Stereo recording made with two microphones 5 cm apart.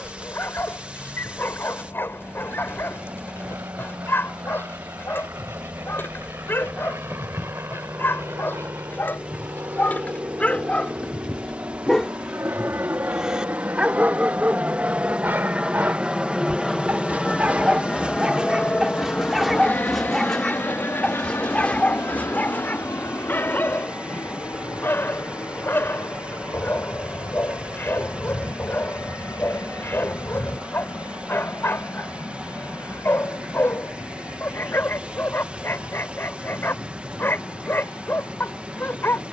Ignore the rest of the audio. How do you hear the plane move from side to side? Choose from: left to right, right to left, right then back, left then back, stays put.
right to left.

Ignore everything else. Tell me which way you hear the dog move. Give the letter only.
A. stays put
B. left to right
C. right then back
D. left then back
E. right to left
C.